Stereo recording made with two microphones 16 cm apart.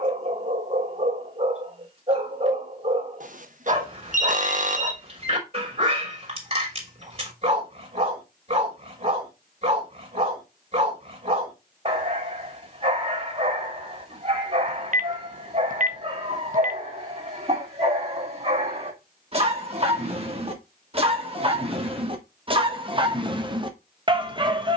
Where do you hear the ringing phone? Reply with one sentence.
In this clip you hear the ringing phone on the right.